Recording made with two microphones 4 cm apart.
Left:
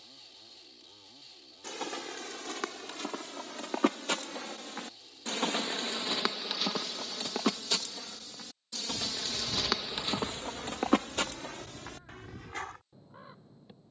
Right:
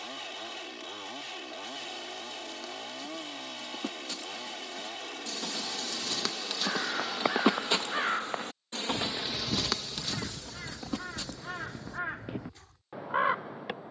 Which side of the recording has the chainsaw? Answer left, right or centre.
right.